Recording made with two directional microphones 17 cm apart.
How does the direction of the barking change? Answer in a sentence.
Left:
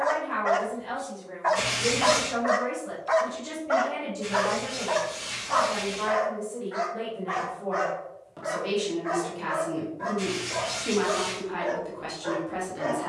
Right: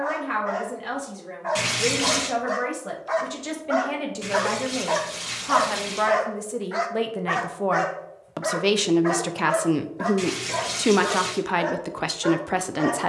In this clip you hear the barking travel towards the right.